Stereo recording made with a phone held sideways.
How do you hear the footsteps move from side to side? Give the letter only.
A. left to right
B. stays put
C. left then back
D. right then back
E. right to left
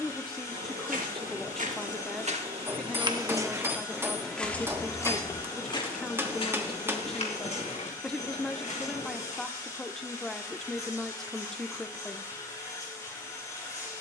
E.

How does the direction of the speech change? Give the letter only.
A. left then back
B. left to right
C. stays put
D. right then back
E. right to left
C.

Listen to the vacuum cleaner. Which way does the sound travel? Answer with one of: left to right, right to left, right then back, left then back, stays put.
stays put.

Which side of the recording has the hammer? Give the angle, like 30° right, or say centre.
20° right.